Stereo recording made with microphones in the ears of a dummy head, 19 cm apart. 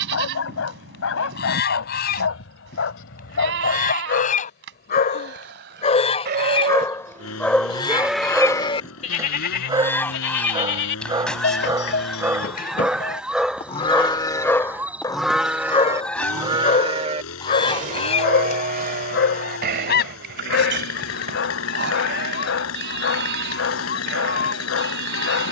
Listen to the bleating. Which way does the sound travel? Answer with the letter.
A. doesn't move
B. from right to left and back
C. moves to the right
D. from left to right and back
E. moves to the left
B.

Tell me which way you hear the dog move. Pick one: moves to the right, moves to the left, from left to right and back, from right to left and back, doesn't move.
from left to right and back.